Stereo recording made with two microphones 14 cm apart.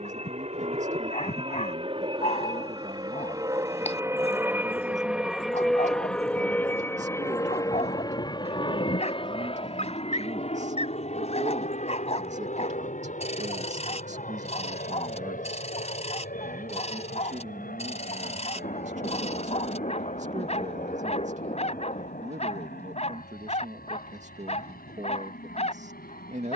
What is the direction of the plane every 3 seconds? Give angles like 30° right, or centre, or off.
40° right, 10° right, 20° left, 40° left, 60° left, 60° left, 70° left, 70° left, 70° left.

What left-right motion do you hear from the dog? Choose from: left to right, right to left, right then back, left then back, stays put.
stays put.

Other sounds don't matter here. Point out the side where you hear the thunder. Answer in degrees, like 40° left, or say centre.
50° left.